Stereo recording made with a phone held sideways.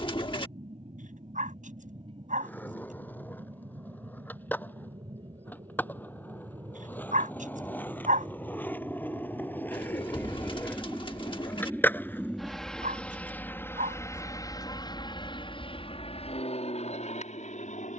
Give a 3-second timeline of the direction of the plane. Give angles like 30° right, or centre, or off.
50° right, 40° right, 40° right, 20° right, 10° left, 50° left.